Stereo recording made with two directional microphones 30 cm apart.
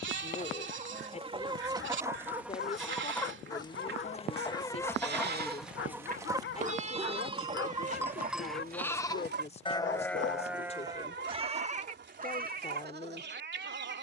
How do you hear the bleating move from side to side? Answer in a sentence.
In this clip you hear the bleating move from right to left and back again.